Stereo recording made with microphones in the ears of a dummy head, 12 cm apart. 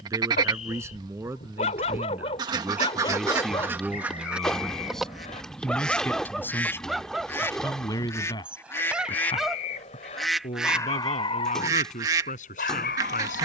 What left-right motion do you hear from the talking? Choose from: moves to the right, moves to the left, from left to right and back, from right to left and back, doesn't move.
moves to the left.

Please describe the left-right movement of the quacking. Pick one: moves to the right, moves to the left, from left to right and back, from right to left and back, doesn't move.
from right to left and back.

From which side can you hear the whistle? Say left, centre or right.
left.